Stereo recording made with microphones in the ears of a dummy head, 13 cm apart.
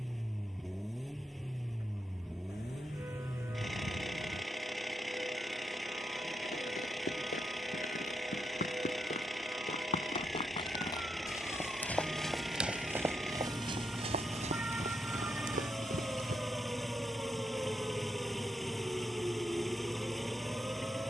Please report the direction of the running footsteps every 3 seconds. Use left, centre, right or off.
off, off, left, left, right, right, off.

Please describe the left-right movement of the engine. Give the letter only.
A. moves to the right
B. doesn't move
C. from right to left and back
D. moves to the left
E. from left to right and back
B.